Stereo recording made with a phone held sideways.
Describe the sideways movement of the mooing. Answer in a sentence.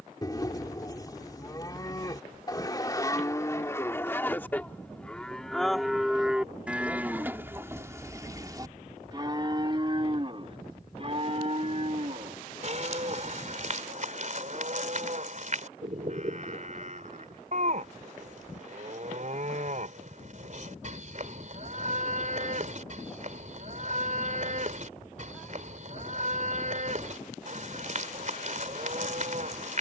You can hear the mooing move from left to right.